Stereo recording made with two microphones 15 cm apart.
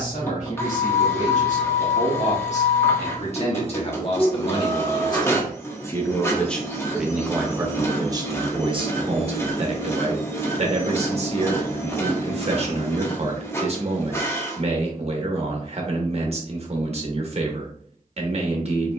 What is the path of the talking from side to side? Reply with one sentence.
You can hear the talking go from the left side to the right.